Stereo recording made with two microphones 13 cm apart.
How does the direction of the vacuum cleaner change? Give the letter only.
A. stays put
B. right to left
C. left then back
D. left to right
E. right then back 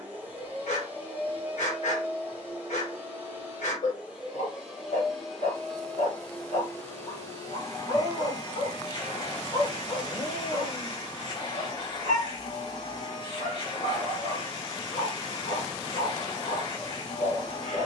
B.